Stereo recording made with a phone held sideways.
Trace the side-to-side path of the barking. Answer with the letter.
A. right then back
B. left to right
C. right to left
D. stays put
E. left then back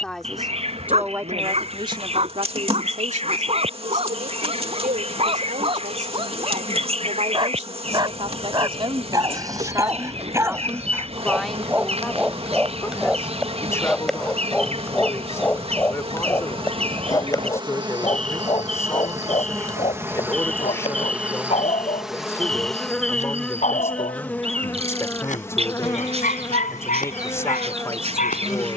C.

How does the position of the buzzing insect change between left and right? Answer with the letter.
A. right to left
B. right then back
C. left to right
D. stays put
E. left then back
A.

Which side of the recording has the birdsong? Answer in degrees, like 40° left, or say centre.
40° right.